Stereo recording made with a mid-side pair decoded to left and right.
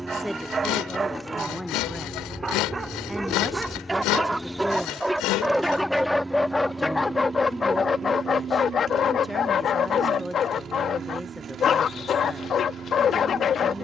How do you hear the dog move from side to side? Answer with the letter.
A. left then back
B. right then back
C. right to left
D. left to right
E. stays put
C.